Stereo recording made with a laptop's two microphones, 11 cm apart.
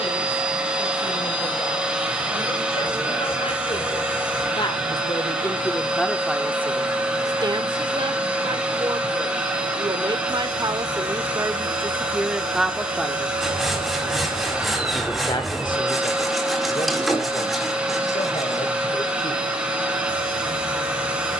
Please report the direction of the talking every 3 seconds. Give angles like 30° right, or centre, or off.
70° left, 40° left, 30° right, 40° right, centre, 50° left, 60° left.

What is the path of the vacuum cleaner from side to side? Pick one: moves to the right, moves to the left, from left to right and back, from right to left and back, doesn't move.
doesn't move.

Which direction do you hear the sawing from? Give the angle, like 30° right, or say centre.
centre.